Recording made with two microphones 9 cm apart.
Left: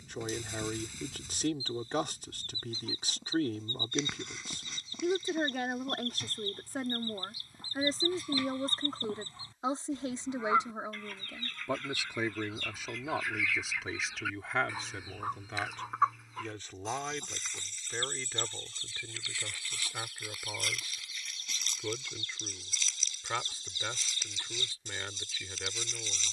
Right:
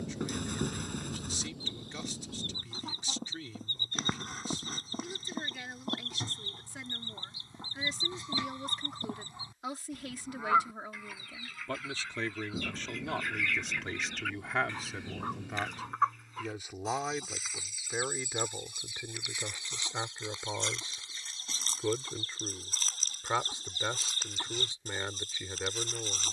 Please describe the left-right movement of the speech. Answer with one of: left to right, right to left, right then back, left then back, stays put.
left to right.